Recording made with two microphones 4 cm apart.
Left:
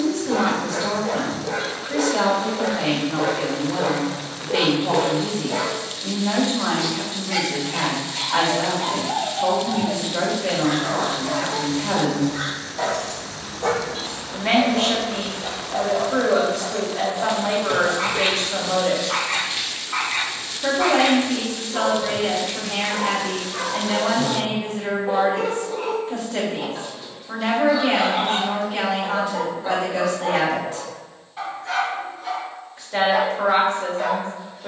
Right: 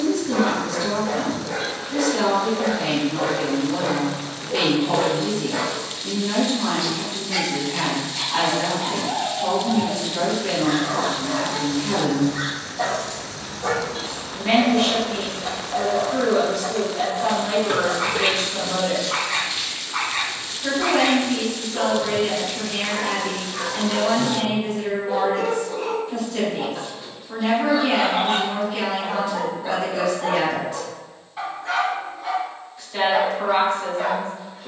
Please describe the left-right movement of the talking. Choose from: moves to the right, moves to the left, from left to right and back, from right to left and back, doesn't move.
doesn't move.